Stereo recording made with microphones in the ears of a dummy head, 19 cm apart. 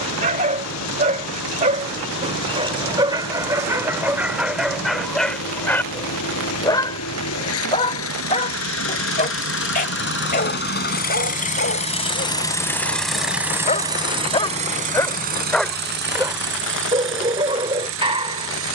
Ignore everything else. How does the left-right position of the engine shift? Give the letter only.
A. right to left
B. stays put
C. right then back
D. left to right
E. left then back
D.